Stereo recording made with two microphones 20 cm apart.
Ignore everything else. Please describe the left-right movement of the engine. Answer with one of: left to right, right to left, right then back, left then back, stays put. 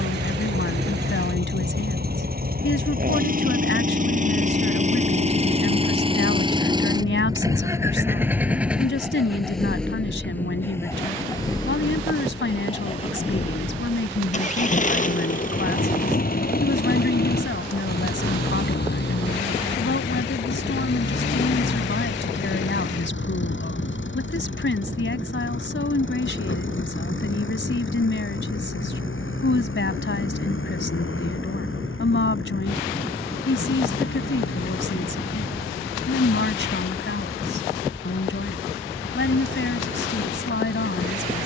right to left.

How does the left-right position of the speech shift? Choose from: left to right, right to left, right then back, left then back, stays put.
stays put.